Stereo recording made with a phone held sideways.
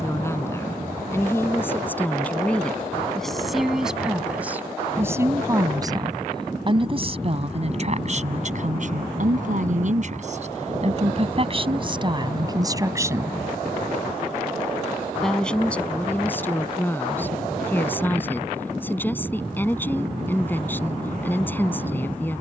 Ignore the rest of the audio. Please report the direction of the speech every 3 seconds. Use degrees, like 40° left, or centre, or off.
10° left, 10° right, 40° right, 50° right, 20° right, 10° left, 10° left, 10° left.